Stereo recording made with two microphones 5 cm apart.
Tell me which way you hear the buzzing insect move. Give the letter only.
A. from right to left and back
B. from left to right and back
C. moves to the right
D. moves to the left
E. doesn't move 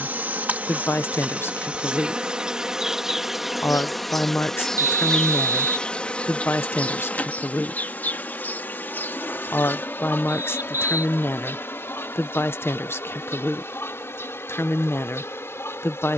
D.